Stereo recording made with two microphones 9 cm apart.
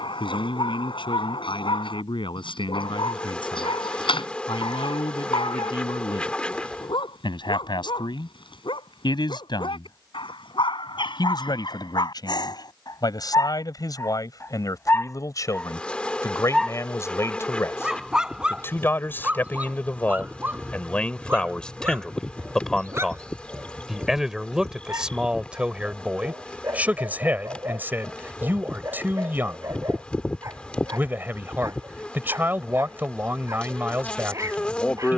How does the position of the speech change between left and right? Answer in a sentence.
In this clip you hear the speech move from left to right.